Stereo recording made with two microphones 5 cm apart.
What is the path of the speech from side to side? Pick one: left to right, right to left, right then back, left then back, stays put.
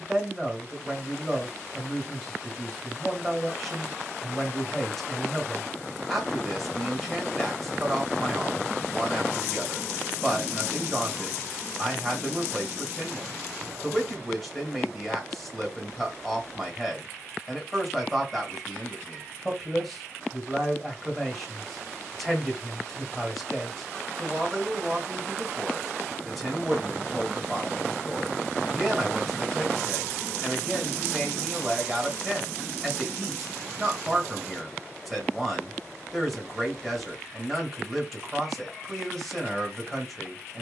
stays put.